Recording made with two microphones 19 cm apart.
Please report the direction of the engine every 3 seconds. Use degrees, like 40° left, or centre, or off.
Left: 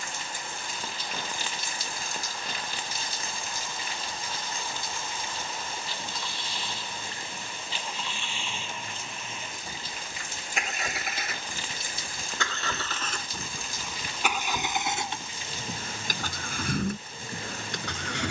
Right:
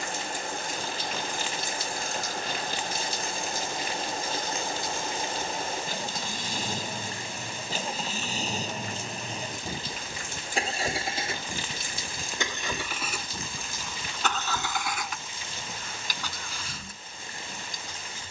50° right, 50° right, 40° right, 30° right, centre, 50° left.